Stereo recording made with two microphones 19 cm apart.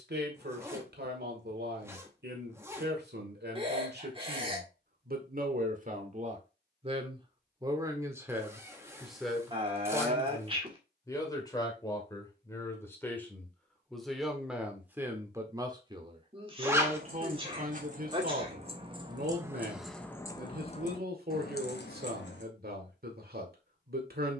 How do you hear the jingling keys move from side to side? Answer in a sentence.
You can hear the jingling keys move from right to left.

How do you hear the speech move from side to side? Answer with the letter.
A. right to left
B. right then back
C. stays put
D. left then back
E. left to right
D.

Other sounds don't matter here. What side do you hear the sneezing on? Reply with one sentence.
In this clip you hear the sneezing on the right.